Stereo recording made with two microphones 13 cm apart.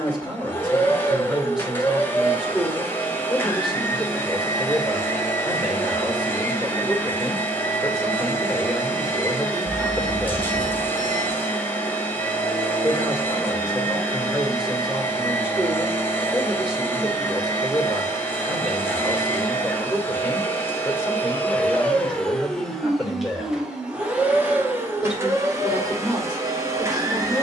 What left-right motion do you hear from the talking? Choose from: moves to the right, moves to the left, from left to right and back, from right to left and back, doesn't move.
doesn't move.